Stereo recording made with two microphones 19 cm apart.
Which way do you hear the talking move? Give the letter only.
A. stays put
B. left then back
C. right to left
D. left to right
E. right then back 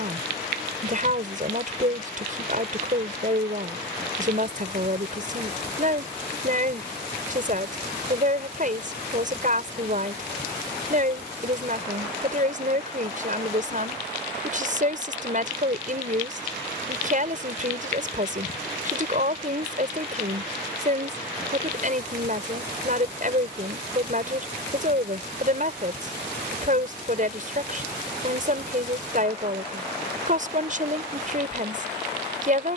A.